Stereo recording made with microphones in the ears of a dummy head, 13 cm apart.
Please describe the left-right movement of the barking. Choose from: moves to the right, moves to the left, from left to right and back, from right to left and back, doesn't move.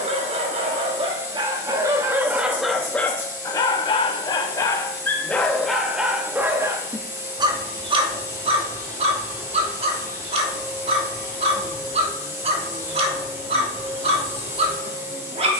from right to left and back.